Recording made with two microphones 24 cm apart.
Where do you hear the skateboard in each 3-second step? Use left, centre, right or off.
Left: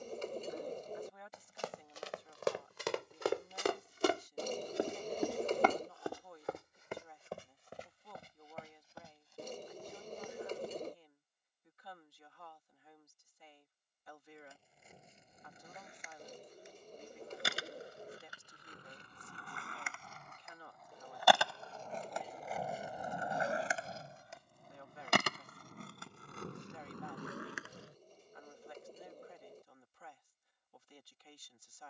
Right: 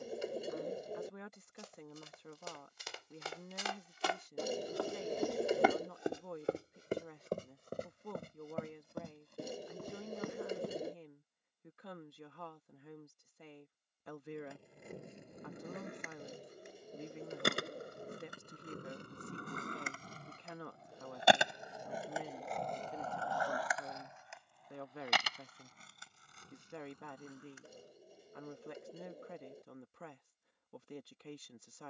off, off, off, off, right, right, right, centre, left, left, off.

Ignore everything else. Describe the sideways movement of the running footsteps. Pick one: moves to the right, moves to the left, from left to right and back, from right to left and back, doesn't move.
moves to the right.